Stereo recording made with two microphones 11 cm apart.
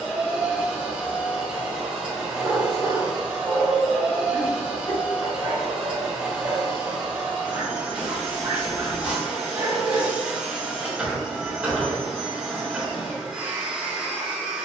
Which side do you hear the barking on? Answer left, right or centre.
right.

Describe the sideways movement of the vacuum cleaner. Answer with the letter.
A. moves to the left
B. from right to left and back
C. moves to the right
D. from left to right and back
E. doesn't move
E.